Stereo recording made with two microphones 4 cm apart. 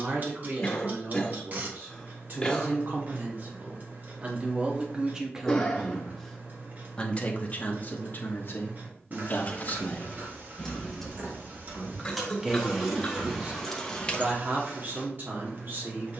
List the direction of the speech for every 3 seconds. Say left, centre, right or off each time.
right, right, left, left, right, right.